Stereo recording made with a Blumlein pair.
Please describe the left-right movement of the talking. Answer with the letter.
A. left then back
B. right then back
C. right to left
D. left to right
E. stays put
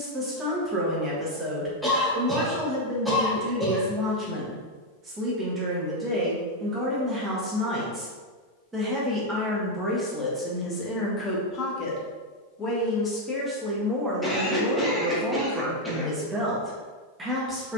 A.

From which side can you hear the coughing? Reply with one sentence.
In this clip you hear the coughing in the centre.